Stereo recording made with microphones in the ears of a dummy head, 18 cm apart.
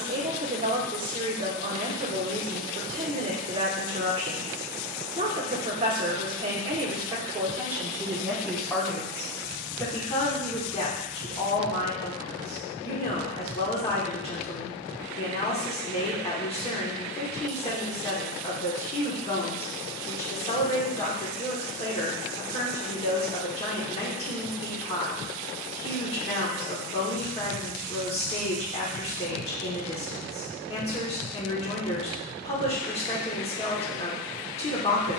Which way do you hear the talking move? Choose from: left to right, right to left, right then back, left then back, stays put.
right to left.